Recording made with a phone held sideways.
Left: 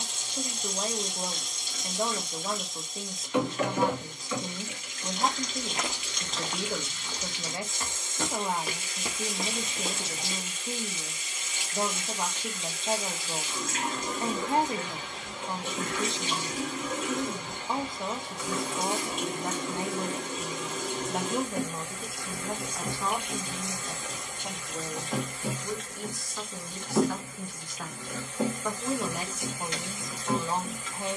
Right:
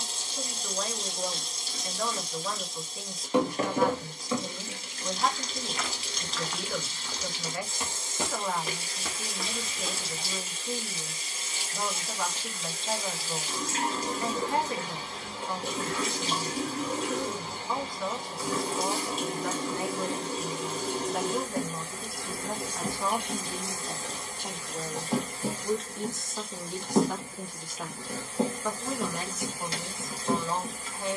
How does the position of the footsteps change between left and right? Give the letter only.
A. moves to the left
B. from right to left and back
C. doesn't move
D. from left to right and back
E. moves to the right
D.